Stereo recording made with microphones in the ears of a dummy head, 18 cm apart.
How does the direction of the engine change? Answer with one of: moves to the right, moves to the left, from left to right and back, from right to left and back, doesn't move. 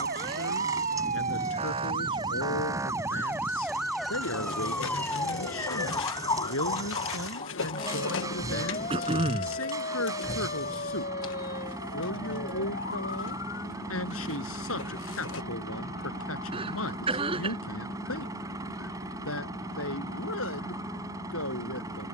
doesn't move.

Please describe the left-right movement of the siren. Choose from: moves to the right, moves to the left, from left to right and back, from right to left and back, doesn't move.
moves to the left.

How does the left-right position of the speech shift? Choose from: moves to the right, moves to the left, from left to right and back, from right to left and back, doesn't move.
doesn't move.